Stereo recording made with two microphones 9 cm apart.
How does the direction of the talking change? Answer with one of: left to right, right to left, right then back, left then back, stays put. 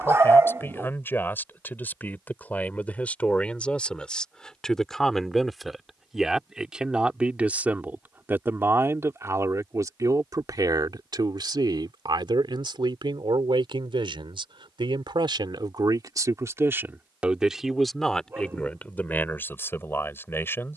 right then back.